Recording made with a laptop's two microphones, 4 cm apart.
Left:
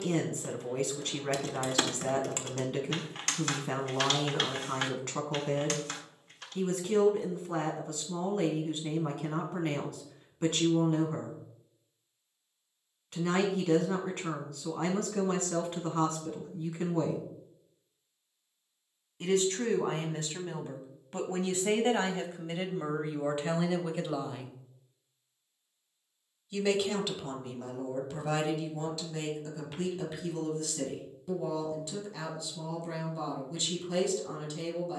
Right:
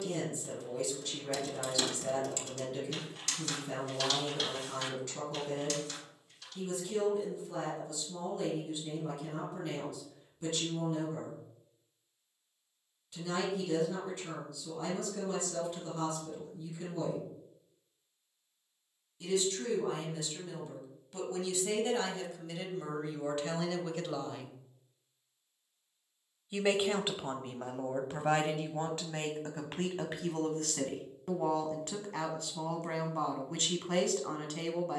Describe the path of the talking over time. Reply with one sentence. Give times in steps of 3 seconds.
You can hear the talking on the left from 0 s, in the centre from 24 s and on the right from 27 s.